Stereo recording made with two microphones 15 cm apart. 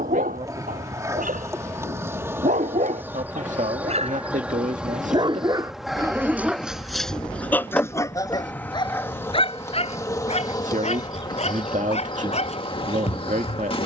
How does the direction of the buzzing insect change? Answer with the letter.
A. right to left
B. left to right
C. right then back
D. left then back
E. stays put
A.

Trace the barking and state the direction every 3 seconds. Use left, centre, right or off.
right, right, centre, left, left.